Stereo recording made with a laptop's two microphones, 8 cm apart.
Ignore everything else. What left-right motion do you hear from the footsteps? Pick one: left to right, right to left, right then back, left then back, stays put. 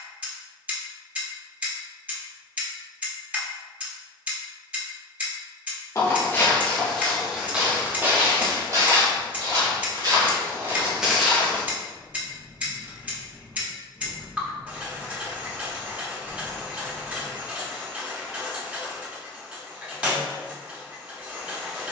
right then back.